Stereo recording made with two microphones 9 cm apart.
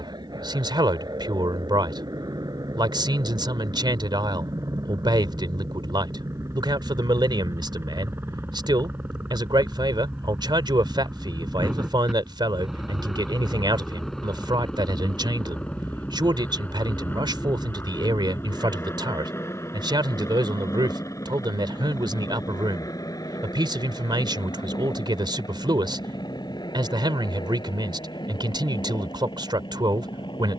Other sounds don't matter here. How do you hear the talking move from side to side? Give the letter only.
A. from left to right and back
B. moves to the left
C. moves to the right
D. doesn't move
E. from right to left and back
D.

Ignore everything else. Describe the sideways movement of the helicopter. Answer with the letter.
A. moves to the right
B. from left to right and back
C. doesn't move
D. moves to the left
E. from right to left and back
D.